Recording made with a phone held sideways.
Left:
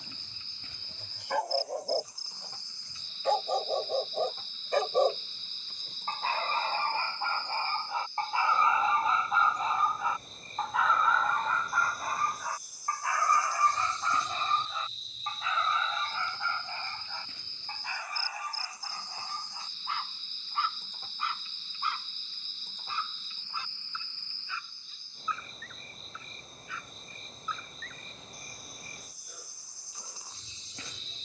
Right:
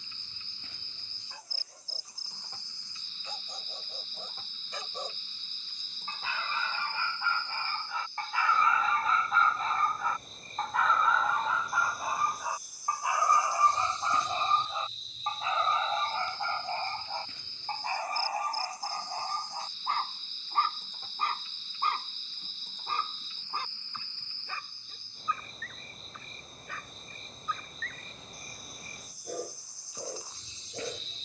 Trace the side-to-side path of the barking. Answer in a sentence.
In this clip you hear the barking move to the right.